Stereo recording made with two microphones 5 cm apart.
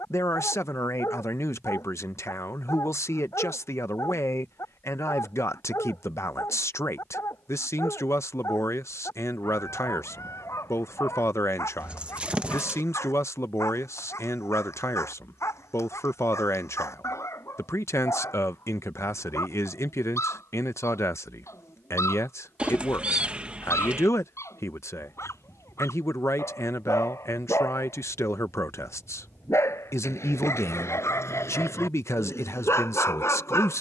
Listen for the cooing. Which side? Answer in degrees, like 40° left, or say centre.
20° right.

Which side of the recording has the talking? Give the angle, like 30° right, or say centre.
70° left.